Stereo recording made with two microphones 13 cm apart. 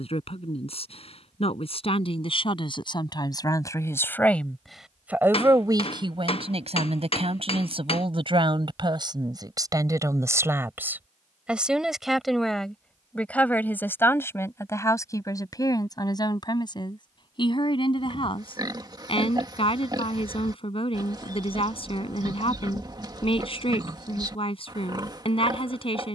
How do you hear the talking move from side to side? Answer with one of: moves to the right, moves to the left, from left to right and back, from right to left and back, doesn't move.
from left to right and back.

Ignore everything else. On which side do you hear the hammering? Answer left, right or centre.
left.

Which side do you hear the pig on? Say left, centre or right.
right.